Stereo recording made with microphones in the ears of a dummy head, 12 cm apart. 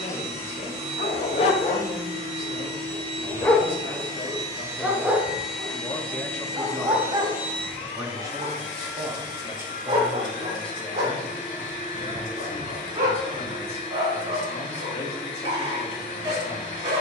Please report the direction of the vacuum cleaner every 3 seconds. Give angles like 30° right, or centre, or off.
50° right, 20° right, 40° left, 60° left, 60° left, 60° left.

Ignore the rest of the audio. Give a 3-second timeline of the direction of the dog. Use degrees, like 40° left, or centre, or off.
50° left, centre, 30° right, 40° right, 50° right, 50° right.